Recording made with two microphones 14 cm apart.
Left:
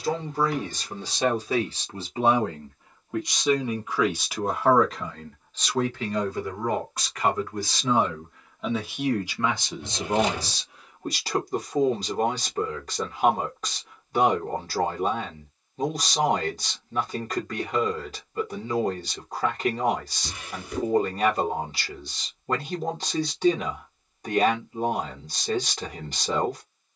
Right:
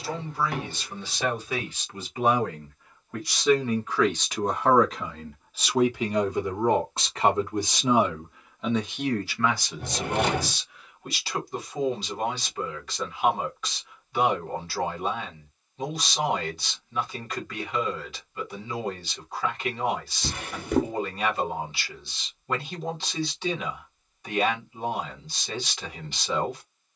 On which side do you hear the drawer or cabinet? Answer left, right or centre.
right.